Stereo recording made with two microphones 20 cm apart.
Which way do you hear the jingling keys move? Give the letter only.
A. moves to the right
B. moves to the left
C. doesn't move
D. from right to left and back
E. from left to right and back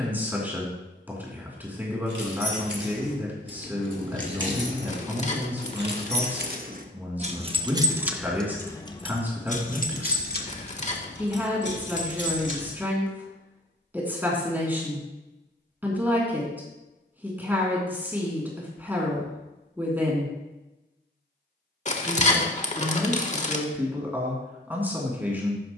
B.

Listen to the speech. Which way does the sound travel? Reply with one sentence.
You can hear the speech stay in one place.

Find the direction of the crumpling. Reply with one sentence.
In this clip you hear the crumpling on the left.